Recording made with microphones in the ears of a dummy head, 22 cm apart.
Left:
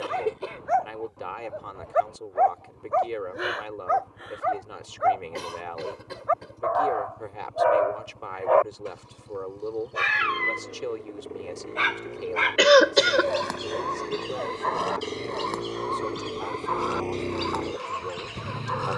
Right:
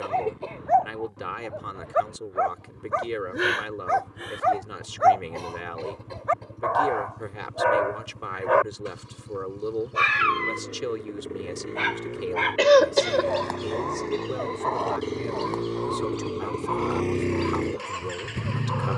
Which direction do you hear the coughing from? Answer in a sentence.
In this clip you hear the coughing on the left.